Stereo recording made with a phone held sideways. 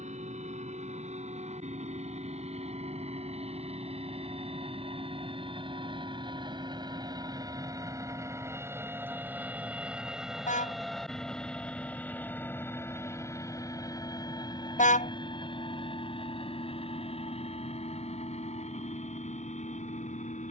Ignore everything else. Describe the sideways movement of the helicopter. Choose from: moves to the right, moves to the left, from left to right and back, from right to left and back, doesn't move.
moves to the left.